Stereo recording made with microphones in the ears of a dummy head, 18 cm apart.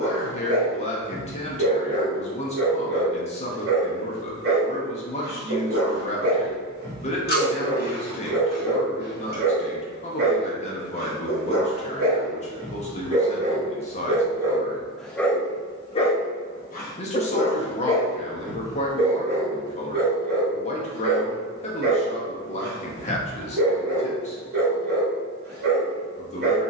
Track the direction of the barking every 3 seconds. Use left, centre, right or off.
right, right, right, right, right, left, right, right, right.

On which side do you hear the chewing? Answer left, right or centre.
left.